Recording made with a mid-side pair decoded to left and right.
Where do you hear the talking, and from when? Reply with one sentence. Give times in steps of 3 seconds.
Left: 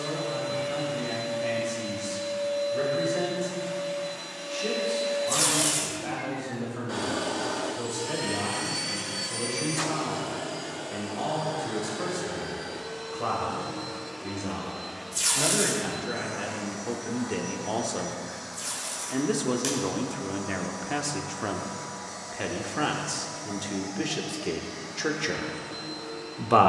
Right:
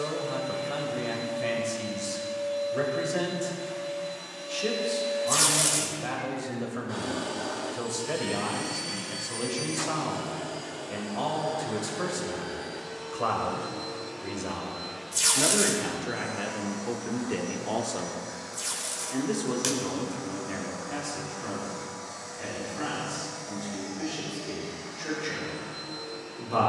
You can hear the talking on the right from 0 s, in the centre from 15 s and on the left from 18 s.